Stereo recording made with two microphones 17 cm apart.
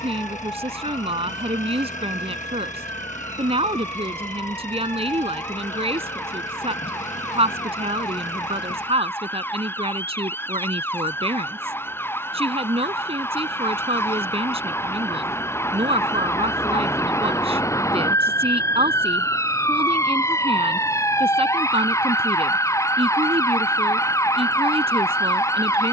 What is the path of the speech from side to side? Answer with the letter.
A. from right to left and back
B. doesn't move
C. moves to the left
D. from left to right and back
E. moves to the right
B.